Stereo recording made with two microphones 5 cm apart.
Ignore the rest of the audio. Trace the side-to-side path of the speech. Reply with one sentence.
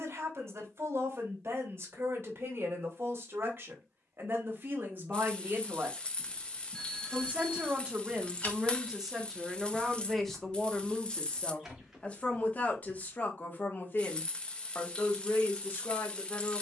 In this clip you hear the speech move to the left.